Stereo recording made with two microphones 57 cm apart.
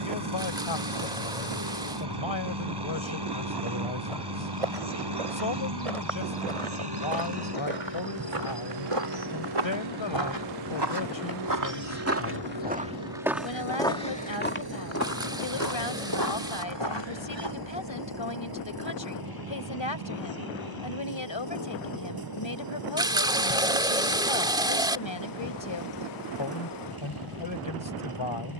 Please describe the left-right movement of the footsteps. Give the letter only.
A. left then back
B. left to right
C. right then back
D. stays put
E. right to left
E.